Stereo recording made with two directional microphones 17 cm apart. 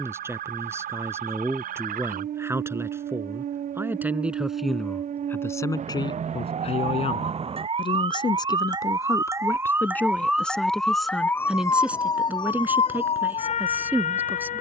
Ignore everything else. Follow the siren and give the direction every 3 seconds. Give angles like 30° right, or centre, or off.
60° right, 50° right, 40° right, centre, 40° left.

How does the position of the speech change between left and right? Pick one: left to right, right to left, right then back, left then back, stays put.
left then back.